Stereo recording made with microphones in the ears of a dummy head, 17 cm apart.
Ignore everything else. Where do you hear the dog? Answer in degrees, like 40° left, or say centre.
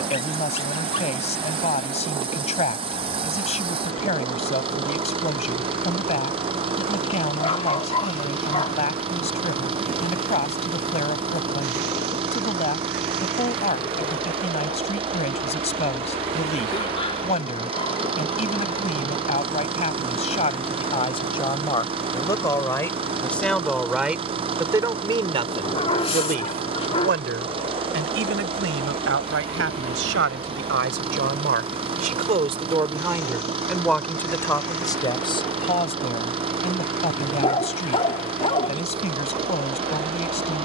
30° left.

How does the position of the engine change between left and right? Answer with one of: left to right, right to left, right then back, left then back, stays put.
stays put.